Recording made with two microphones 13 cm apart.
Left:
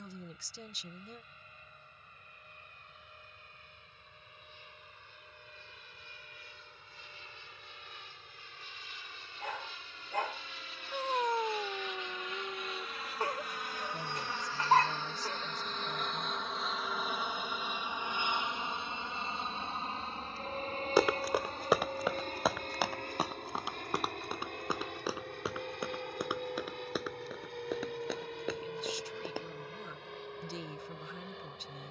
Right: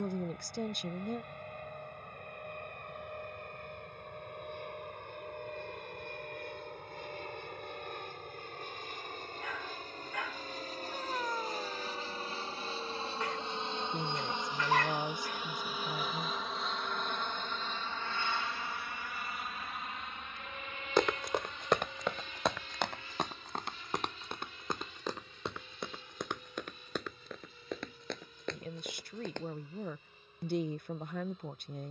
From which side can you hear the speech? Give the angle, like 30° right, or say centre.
60° right.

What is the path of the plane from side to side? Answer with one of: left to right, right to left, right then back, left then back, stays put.
right to left.